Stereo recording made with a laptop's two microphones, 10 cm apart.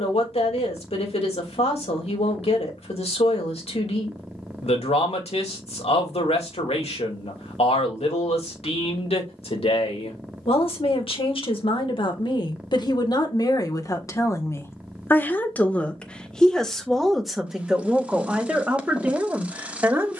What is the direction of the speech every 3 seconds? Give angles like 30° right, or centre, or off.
80° left, 80° left, 80° left, 70° left, 40° left, 10° left, 10° right.